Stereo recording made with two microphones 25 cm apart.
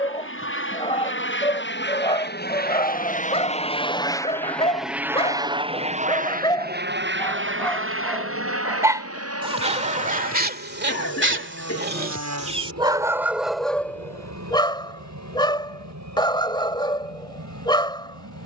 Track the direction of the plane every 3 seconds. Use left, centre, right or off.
left, centre, right, right, right, right.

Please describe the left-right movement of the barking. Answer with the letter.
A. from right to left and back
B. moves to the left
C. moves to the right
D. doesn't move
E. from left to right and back
E.